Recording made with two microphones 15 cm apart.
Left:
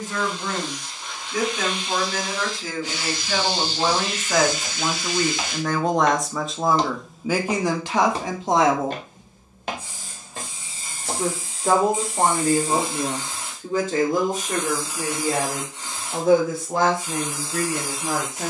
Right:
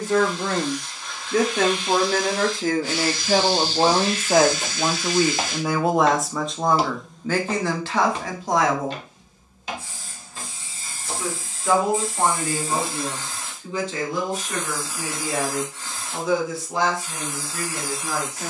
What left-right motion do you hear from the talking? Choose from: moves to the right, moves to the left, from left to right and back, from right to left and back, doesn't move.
moves to the left.